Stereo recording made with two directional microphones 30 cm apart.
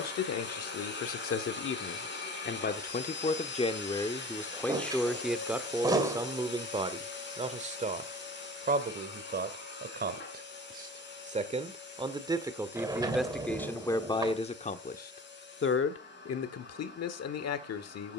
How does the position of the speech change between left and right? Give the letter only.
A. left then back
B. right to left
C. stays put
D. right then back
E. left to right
D.